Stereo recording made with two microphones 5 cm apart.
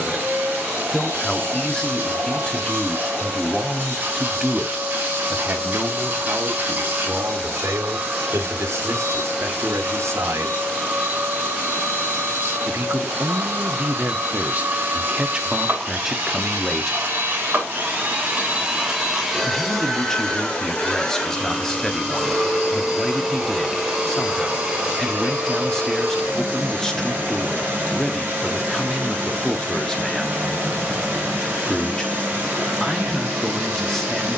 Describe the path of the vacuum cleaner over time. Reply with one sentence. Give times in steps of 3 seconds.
You can hear the vacuum cleaner on the right from 0 s, in the centre from 18 s and on the right from 24 s.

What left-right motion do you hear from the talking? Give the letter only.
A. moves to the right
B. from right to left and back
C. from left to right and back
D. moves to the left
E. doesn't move
C.